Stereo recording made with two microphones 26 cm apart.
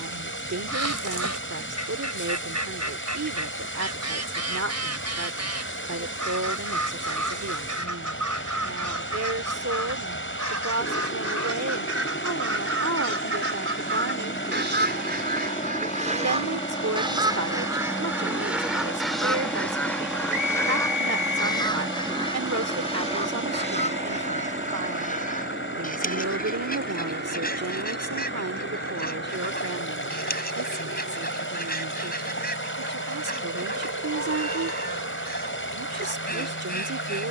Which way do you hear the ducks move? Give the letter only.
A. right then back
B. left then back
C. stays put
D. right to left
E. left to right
D.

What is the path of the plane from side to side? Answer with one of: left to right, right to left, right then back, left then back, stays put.
left to right.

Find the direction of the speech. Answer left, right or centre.
right.